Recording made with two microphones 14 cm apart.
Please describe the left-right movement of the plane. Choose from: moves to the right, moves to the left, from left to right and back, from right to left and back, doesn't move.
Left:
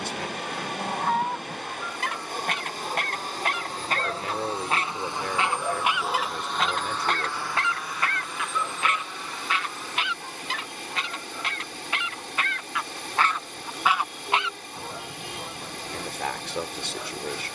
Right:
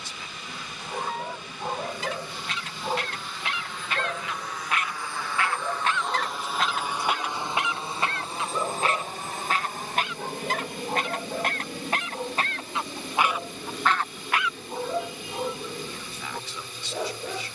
moves to the right.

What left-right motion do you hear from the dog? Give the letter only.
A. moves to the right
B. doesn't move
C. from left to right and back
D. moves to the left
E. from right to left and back
E.